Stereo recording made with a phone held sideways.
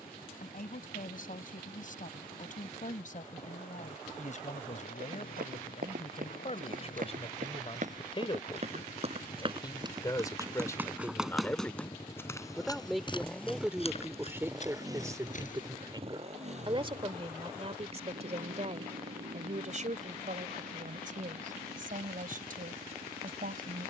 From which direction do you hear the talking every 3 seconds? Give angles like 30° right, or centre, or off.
60° left, 50° left, 40° left, 20° left, 10° right, 30° right, 50° right, 60° right.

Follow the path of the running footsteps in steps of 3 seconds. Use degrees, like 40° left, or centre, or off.
off, 60° right, 50° right, 20° right, 30° left, 50° left, off, off.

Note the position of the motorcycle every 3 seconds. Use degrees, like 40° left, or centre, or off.
70° left, 70° left, 60° left, 40° left, centre, 40° right, 60° right, 70° right.